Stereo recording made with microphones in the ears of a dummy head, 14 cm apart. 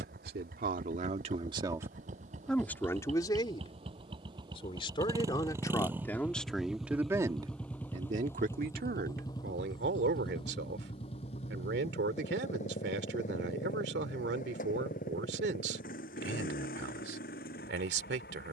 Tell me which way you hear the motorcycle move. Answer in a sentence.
You can hear the motorcycle move to the left.